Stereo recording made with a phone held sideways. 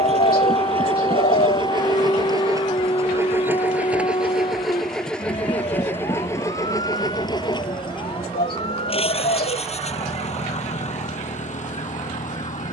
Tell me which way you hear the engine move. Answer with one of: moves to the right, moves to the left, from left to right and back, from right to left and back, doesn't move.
moves to the left.